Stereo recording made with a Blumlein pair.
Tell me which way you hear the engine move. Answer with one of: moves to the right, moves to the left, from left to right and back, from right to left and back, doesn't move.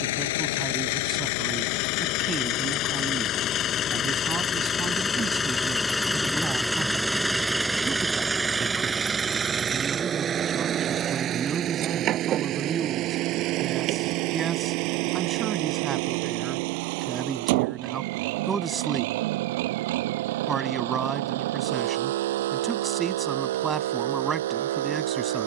moves to the right.